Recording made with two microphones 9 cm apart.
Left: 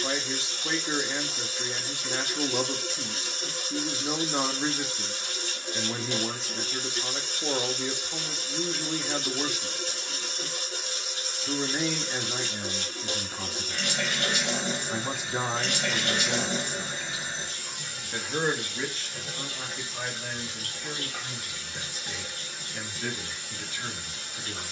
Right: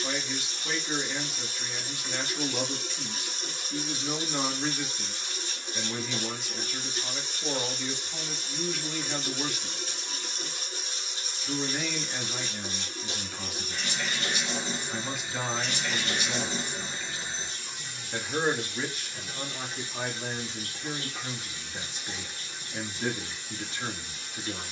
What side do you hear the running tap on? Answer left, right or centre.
left.